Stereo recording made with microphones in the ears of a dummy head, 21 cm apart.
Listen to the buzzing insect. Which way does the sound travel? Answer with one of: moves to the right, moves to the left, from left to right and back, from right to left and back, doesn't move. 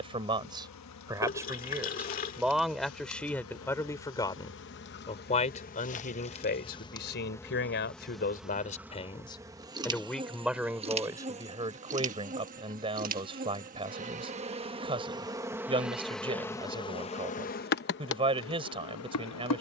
from left to right and back.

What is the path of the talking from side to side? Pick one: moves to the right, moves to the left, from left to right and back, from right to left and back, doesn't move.
from right to left and back.